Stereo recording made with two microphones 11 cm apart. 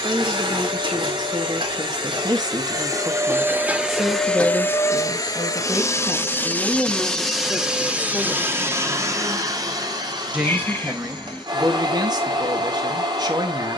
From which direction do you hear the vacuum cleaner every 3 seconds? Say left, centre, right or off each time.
right, centre, centre, right, right.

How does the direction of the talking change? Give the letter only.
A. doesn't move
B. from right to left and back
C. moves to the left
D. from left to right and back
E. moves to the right
B.